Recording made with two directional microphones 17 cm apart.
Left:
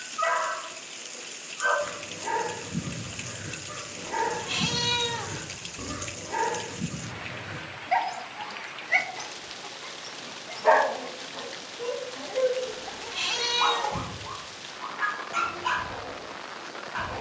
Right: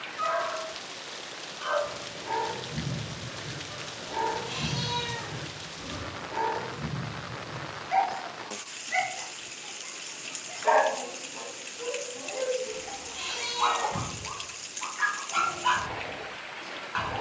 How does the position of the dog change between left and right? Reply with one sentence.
You can hear the dog move from left to right.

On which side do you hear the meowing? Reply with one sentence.
You can hear the meowing on the left.